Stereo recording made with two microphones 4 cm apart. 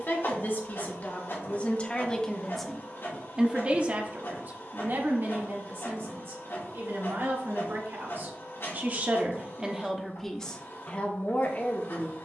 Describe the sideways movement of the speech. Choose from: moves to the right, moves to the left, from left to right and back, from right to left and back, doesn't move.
from left to right and back.